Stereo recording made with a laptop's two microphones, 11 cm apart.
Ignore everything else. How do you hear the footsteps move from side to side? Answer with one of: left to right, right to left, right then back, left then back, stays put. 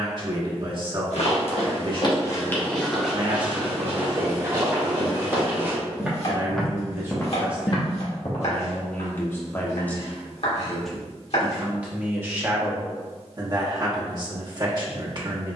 right then back.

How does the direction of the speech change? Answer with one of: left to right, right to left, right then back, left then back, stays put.
left then back.